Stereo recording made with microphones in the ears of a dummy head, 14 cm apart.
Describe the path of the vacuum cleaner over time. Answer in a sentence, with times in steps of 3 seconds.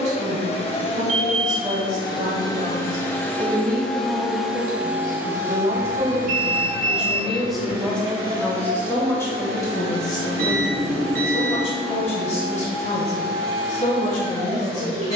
You can hear the vacuum cleaner on the left from 0 s, in the centre from 3 s and on the right from 6 s.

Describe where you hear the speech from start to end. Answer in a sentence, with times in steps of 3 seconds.
In this clip you hear the speech on the right from 0 s, in the centre from 6 s and on the left from 9 s.